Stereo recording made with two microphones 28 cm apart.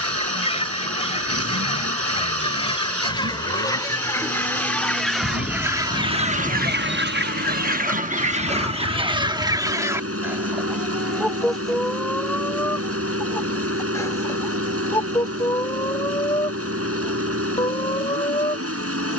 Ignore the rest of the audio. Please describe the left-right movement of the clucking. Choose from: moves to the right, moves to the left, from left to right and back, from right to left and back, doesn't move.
from left to right and back.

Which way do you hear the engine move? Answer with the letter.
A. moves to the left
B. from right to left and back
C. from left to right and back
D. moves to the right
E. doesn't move
E.